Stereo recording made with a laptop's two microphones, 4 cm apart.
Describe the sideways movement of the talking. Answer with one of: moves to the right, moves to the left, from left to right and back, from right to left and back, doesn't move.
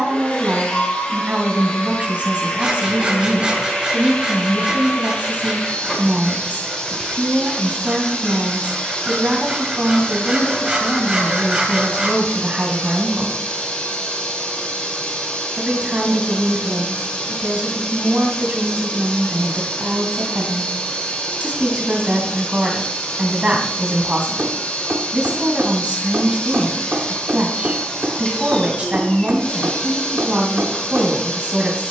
doesn't move.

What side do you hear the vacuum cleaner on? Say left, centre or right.
left.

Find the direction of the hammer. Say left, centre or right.
right.